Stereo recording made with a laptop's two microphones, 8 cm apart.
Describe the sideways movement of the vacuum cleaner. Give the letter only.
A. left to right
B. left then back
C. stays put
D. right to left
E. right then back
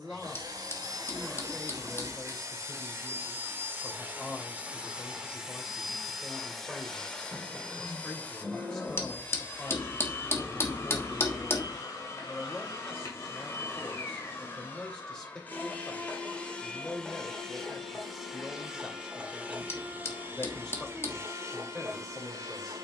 B.